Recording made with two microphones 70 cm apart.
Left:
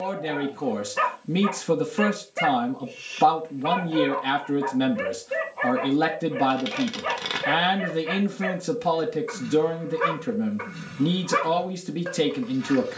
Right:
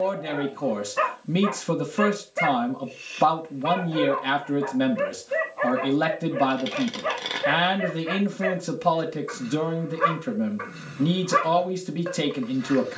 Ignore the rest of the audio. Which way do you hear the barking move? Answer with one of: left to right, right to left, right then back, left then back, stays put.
stays put.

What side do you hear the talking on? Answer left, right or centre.
centre.